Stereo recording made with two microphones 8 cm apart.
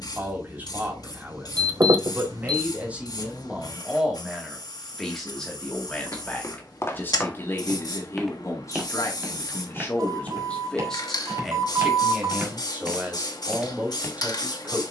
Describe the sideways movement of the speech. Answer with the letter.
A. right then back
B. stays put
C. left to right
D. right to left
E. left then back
E.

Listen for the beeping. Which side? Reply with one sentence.
In this clip you hear the beeping on the right.